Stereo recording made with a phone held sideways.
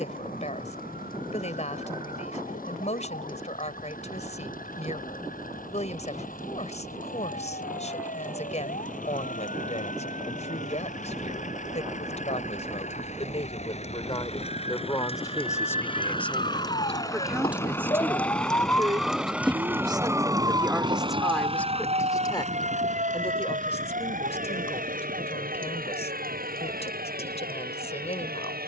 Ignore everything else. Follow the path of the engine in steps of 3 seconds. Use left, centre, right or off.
left, left, left, left, left, left, centre, right, right, right.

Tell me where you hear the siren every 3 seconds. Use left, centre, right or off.
left, left, left, left, left, left, centre, right, right, right.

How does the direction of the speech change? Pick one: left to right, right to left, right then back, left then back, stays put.
right then back.